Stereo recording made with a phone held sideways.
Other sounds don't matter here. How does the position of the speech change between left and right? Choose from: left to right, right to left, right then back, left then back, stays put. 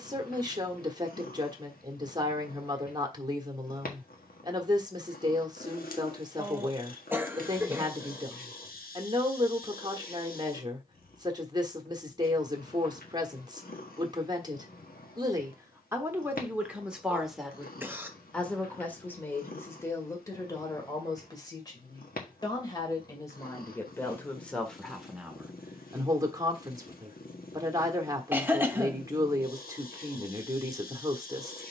left then back.